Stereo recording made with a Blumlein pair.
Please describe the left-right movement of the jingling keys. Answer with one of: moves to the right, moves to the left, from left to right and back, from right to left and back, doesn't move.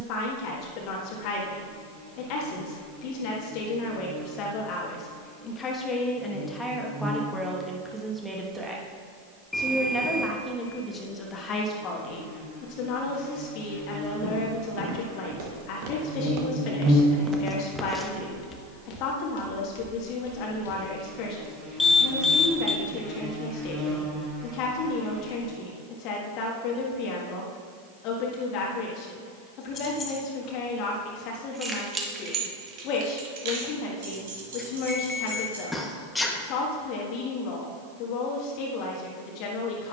moves to the right.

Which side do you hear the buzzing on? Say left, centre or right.
right.